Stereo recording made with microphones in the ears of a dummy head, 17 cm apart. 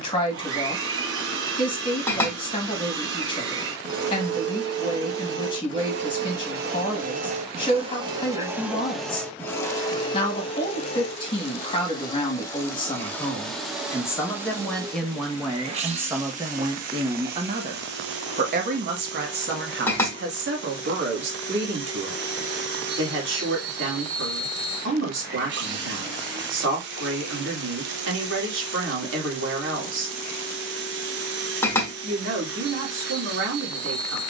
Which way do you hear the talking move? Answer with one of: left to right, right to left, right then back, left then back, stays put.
left to right.